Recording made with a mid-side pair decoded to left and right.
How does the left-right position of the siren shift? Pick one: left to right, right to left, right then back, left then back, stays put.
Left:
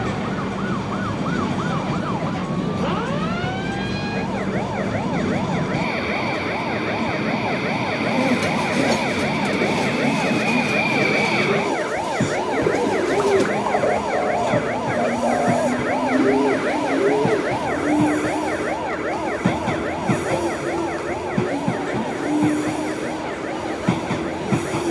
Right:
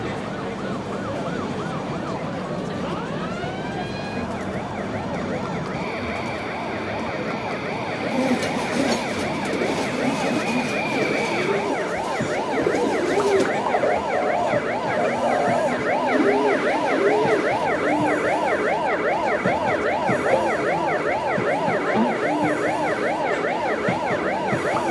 left to right.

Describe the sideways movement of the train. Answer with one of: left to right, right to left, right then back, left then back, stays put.
stays put.